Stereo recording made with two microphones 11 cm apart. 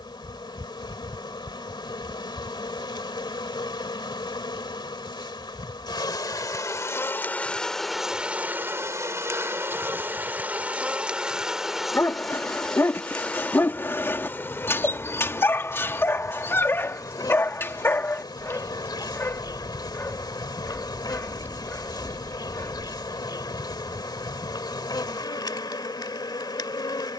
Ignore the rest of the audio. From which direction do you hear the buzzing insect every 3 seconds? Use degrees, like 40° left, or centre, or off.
50° left, 50° left, 10° left, 10° right, 10° left, 40° left, 40° left, 40° left, 40° left.